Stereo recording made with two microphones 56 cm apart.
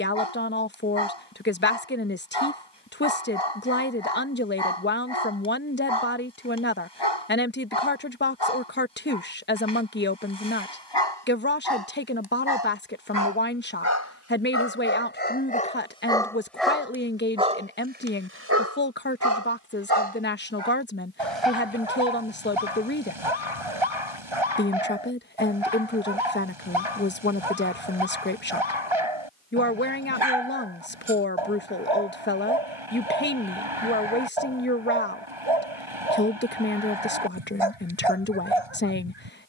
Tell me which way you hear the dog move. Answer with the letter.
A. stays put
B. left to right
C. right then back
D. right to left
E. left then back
B.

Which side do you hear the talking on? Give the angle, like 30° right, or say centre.
20° left.